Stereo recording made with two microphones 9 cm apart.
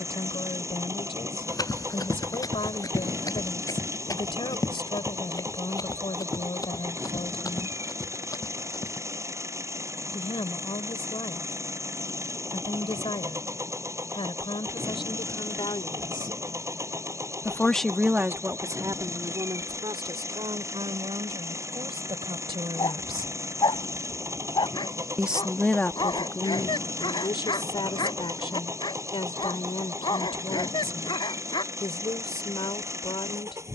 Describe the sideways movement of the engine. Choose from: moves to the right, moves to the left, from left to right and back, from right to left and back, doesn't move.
doesn't move.